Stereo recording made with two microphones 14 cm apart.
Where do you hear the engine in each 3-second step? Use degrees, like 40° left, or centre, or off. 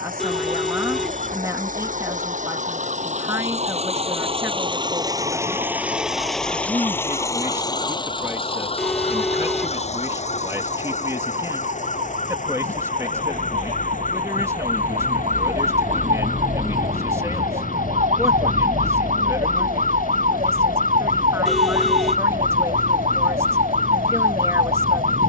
70° right, 40° right, 20° left, 50° left, 60° left, 70° left, 70° left, 70° left, 70° left.